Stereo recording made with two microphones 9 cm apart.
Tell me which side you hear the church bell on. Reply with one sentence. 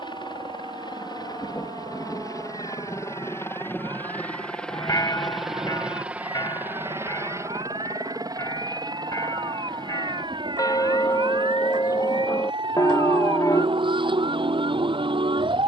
In this clip you hear the church bell on the left.